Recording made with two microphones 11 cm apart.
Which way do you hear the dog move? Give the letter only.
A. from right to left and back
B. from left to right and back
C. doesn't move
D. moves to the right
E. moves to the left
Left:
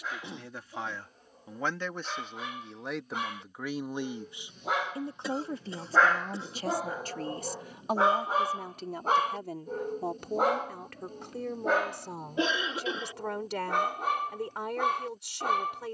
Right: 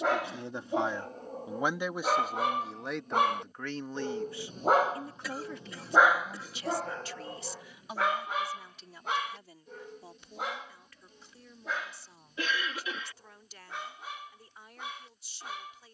E.